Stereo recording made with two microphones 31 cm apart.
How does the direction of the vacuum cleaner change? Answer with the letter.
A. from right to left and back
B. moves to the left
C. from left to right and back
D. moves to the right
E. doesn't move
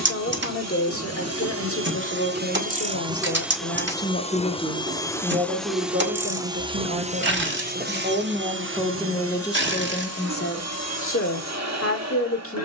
A.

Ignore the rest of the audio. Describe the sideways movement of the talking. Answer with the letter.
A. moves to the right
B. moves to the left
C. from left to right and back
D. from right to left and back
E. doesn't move
C.